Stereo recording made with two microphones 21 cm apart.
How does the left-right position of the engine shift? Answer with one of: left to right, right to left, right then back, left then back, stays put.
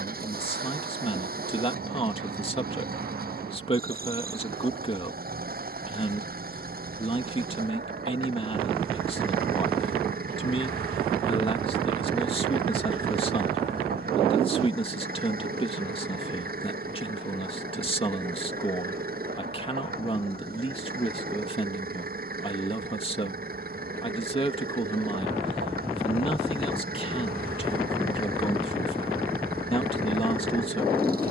stays put.